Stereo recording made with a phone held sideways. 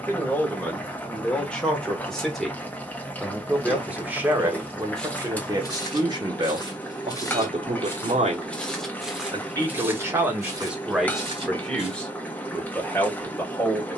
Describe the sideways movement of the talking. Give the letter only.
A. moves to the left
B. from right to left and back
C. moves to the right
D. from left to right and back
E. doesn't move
D.